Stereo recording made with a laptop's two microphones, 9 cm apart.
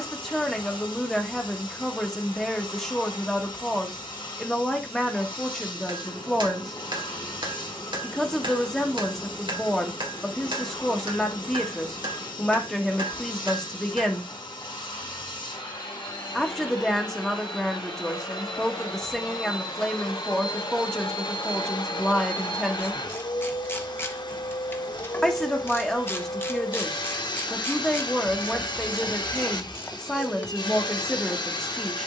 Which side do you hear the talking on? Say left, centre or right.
centre.